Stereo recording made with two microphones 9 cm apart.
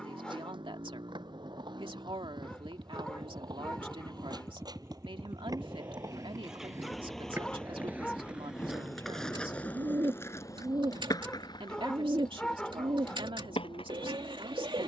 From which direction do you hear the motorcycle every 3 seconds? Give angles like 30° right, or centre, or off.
50° right, 30° right, 10° left, 40° left, 60° left.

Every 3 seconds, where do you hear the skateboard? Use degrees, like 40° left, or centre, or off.
60° right, 50° right, 20° right, 30° left, 70° left.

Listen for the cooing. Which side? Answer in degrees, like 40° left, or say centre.
60° right.